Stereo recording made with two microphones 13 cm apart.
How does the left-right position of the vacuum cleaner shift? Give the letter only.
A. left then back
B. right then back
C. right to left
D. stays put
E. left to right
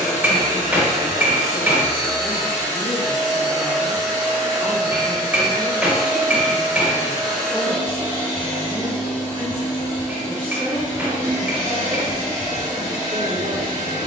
D.